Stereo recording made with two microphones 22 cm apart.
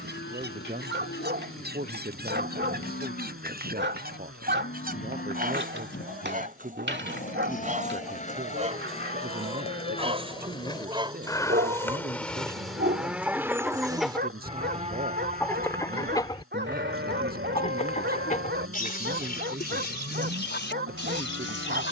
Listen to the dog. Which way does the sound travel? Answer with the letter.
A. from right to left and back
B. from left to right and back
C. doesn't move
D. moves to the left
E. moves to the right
C.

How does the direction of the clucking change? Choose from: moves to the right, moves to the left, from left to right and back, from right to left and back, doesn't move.
moves to the left.